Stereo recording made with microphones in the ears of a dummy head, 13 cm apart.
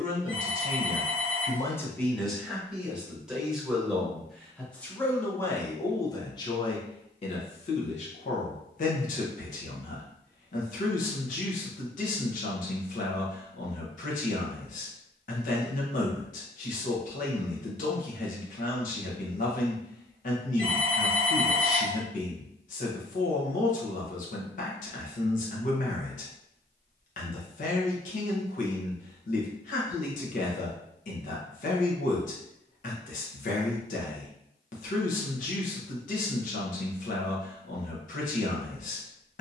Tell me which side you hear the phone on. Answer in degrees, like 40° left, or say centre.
40° left.